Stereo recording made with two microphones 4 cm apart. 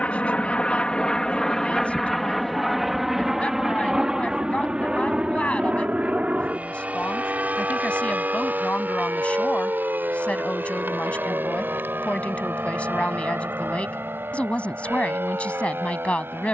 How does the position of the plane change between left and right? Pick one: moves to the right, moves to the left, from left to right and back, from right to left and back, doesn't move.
moves to the right.